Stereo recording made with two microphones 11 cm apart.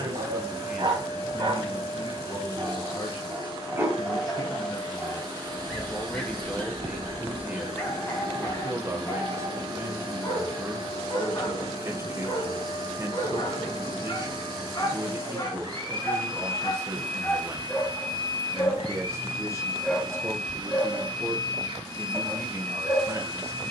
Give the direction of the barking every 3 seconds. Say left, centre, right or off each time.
right, centre, left, left, left, left, centre, right.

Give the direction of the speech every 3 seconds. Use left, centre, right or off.
left, left, centre, right, right, right, right, right.